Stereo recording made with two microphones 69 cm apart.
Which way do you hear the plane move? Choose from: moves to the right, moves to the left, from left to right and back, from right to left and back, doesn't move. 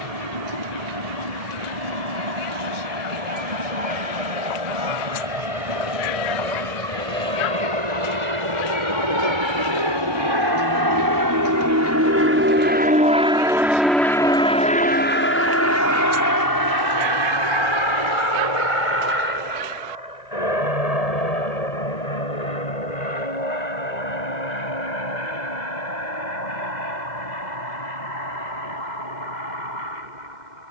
moves to the left.